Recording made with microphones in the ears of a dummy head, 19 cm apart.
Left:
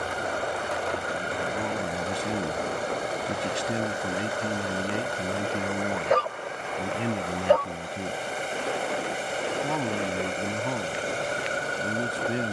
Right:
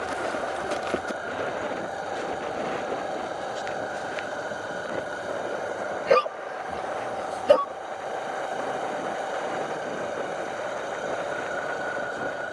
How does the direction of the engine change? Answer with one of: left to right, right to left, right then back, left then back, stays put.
stays put.